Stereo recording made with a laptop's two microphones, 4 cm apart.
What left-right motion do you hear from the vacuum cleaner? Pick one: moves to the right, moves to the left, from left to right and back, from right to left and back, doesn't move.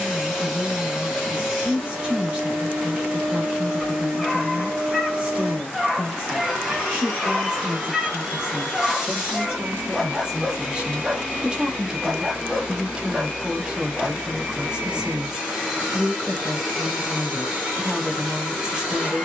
doesn't move.